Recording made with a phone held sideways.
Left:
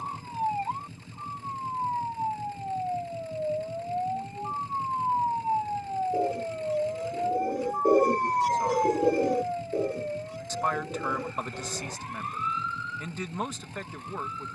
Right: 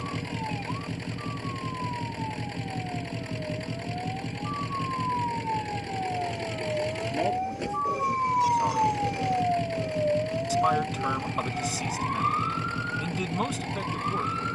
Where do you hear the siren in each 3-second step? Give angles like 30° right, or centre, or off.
40° left, 30° left, centre, 40° right, 60° right.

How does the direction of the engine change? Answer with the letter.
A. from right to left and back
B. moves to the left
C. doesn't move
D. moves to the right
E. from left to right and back
C.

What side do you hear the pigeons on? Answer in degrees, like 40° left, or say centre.
60° left.